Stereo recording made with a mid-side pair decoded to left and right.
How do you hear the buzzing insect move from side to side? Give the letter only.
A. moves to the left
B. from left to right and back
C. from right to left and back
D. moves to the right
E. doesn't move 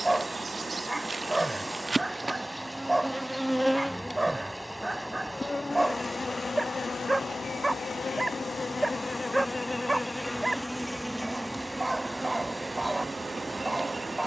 C.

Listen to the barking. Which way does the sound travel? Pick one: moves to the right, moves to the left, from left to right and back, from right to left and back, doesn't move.
doesn't move.